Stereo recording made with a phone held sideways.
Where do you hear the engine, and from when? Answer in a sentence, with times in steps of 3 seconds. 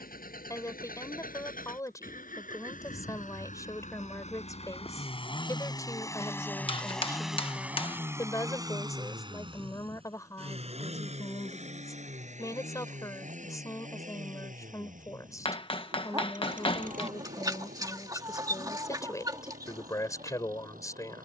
You can hear the engine on the left from 0 s, in the centre from 6 s and on the right from 9 s.